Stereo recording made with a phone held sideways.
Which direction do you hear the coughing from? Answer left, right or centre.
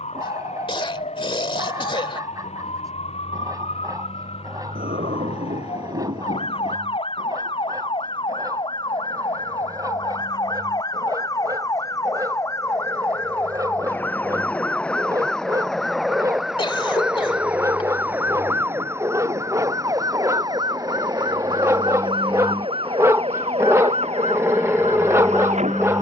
left.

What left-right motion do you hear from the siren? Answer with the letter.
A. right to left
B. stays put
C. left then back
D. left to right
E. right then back
D.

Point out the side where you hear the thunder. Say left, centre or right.
right.